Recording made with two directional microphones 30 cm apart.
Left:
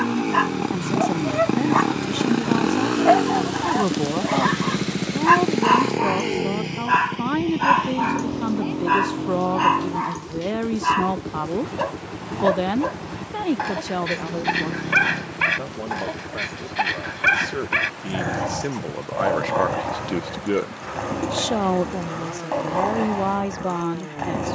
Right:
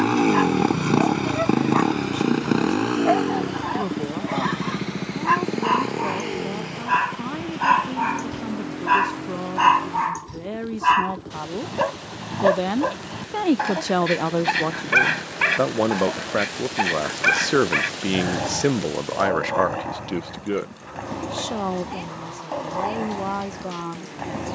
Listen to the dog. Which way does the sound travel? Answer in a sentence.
In this clip you hear the dog go right and come back.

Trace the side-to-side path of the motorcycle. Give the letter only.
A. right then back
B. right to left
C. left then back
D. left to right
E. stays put
B.